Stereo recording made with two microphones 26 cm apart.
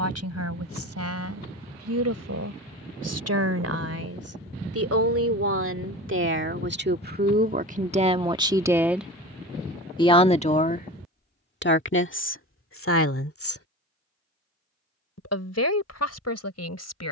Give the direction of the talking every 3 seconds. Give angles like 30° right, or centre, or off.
70° right, 60° right, 30° right, 30° left, 50° left, 70° left.